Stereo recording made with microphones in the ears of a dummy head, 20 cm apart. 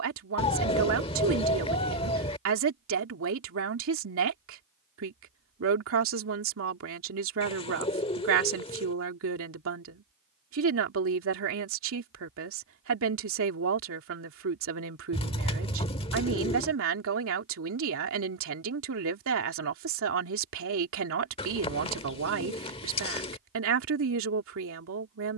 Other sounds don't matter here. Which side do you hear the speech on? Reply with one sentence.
You can hear the speech on the right.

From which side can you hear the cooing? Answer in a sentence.
In this clip you hear the cooing on the left.